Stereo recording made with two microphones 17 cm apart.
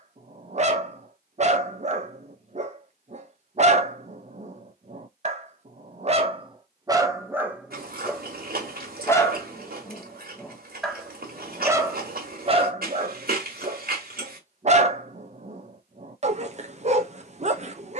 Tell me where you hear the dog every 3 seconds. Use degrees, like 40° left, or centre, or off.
40° right, 40° right, 20° right, 10° left, 40° right, 40° right.